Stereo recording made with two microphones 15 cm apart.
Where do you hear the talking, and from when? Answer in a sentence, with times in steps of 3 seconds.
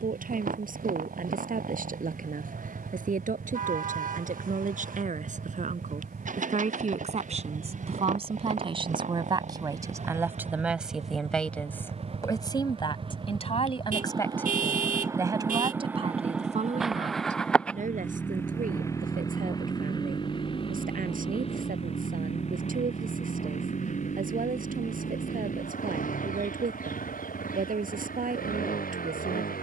In this clip you hear the talking on the right from 0 s, in the centre from 9 s, on the left from 12 s and on the right from 15 s.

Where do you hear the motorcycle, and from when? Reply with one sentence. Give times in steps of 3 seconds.
In this clip you hear the motorcycle on the right from 0 s, in the centre from 15 s and on the left from 18 s.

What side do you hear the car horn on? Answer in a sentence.
In this clip you hear the car horn on the right.